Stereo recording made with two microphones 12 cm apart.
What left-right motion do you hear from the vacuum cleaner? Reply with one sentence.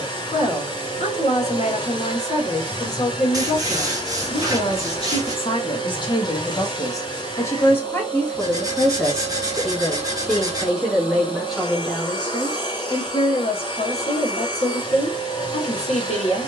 In this clip you hear the vacuum cleaner stay put.